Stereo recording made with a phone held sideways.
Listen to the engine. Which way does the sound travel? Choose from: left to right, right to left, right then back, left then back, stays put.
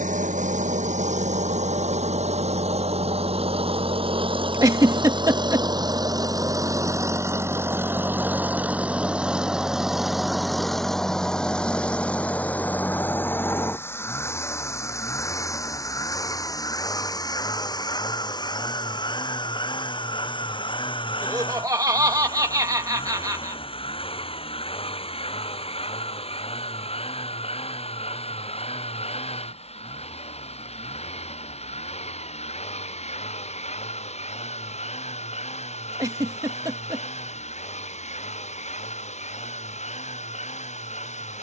right to left.